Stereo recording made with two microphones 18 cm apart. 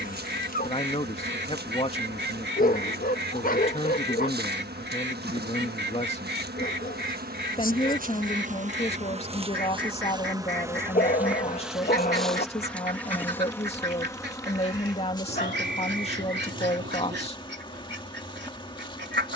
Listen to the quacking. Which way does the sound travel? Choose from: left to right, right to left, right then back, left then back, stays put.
stays put.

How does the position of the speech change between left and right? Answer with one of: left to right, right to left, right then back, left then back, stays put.
stays put.